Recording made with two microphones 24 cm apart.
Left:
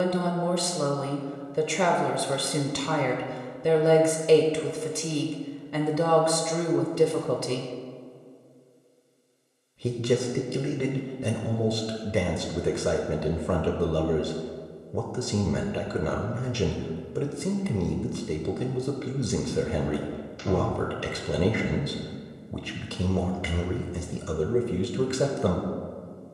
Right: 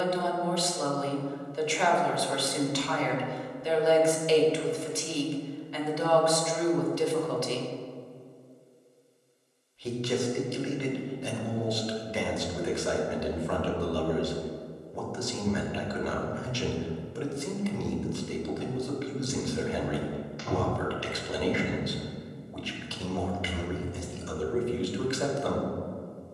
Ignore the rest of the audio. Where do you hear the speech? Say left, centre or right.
left.